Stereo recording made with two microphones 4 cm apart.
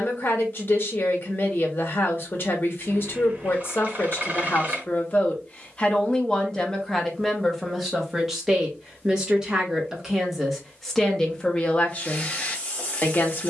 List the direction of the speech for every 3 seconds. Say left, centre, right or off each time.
left, left, centre, centre, left.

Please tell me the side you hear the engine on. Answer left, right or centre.
right.